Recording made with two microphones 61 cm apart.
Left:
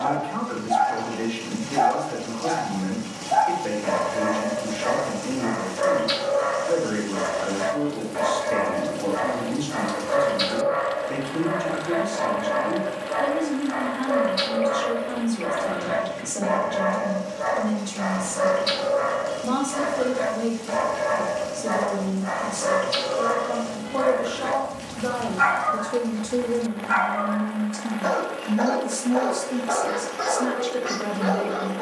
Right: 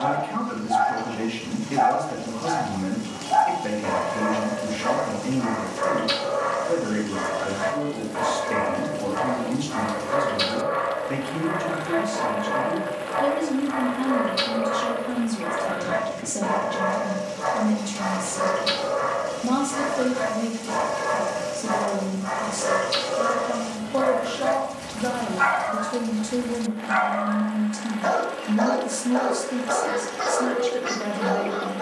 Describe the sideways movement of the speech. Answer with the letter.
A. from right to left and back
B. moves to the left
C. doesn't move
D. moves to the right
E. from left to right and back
B.